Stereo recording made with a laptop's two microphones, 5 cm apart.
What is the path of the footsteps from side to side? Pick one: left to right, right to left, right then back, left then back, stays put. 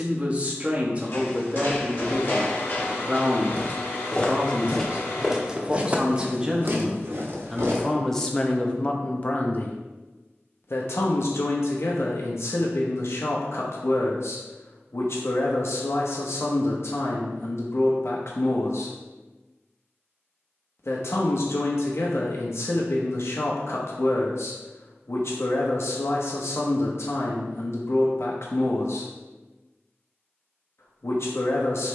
left to right.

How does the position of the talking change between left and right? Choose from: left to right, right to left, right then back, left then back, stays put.
right to left.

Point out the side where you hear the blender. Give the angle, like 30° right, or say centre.
50° left.